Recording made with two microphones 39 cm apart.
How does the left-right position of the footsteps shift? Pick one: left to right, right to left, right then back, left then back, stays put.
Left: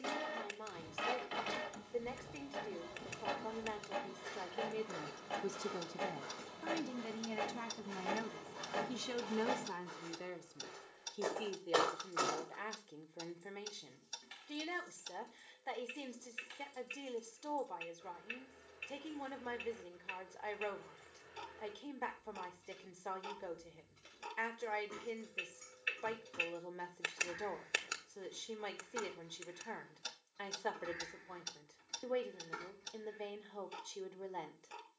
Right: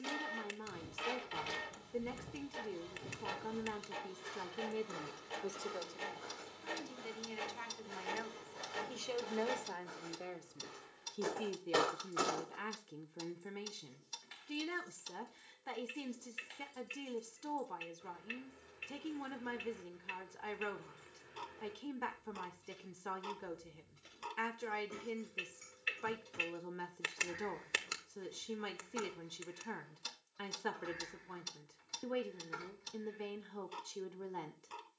left then back.